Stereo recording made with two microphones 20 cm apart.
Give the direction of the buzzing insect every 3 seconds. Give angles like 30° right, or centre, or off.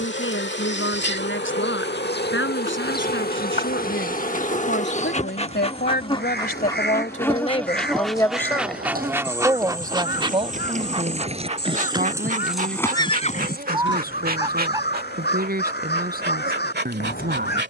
60° left, 40° left, 10° left, 20° right, 40° right, 50° right.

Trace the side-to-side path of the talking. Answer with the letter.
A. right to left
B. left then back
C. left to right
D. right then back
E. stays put
C.